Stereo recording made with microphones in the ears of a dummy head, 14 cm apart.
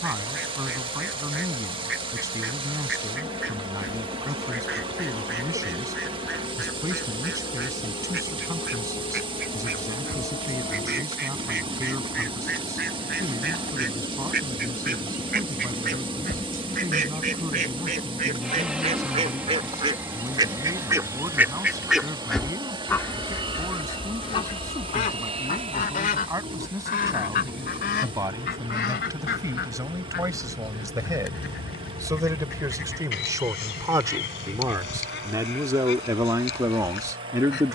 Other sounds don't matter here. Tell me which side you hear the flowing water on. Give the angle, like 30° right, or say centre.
30° right.